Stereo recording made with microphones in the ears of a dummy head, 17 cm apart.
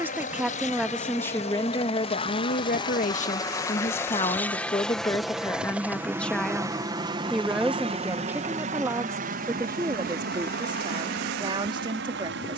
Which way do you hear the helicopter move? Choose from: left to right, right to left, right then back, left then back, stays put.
left to right.